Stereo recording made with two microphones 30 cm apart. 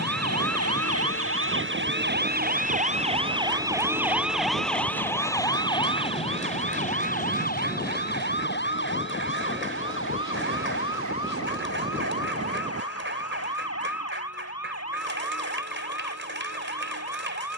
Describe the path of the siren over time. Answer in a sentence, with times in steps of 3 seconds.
You can hear the siren on the right from 0 s, in the centre from 3 s and on the left from 6 s.